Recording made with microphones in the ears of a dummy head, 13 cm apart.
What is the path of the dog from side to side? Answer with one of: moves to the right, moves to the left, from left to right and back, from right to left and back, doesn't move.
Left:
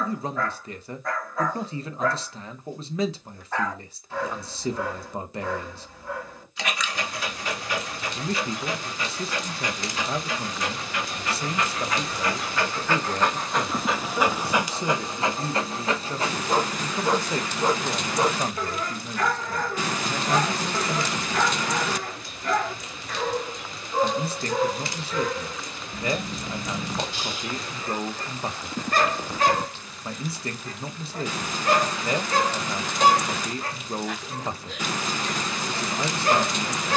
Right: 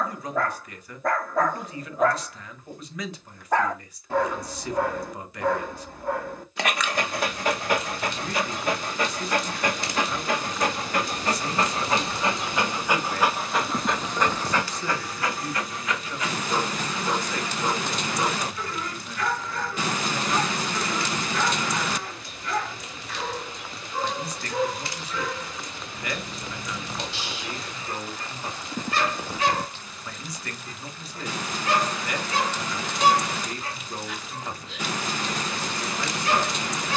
moves to the left.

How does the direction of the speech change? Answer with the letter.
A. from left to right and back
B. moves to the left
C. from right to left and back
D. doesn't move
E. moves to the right
D.